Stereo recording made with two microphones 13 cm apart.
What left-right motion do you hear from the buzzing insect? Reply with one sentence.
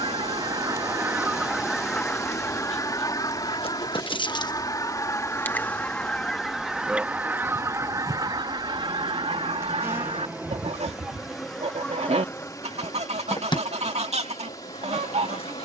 In this clip you hear the buzzing insect move from left to right and back again.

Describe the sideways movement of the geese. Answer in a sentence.
In this clip you hear the geese go left and come back.